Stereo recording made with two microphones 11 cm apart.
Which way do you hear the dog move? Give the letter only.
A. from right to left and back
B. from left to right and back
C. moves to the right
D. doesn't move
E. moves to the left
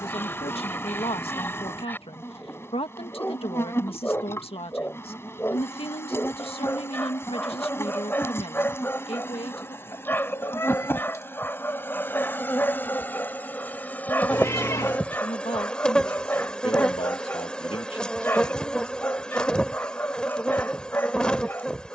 D.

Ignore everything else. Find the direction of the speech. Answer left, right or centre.
left.